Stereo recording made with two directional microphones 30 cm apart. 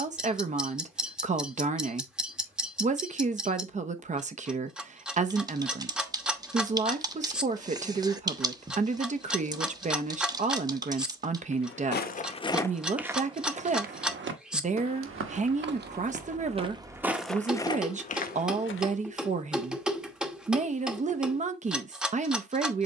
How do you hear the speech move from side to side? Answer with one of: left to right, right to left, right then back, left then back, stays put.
stays put.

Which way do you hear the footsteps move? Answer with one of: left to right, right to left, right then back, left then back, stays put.
right then back.